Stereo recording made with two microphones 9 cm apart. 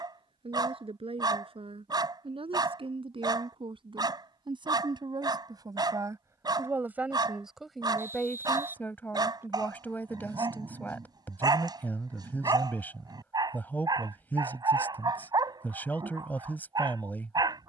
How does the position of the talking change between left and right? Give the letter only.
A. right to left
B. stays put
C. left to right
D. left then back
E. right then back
A.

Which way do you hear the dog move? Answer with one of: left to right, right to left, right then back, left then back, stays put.
stays put.